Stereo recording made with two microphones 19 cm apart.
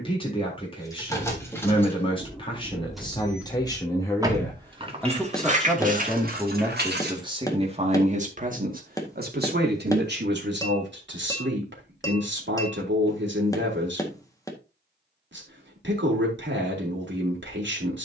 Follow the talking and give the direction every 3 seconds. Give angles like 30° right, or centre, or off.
30° left, 10° left, 30° right, 70° right, 70° right, 70° right.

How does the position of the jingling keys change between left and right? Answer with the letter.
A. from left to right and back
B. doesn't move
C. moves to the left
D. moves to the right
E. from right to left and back
D.